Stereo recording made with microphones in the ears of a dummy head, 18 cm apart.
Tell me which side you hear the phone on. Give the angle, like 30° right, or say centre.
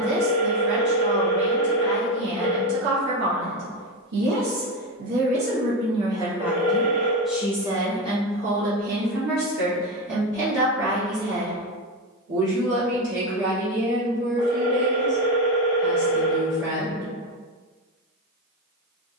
30° right.